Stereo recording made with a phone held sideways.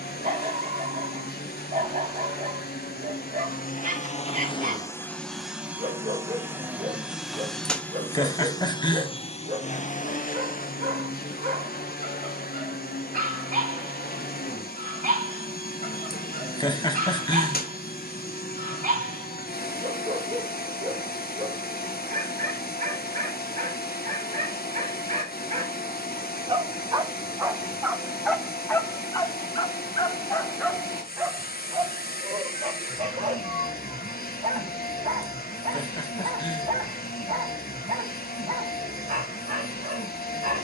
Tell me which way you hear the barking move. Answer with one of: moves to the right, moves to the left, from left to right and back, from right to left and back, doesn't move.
from right to left and back.